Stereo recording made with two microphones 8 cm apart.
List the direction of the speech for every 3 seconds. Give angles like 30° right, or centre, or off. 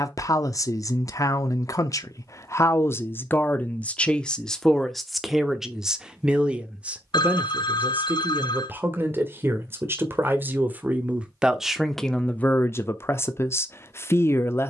40° left, 10° left, 20° right, 20° right, 30° left.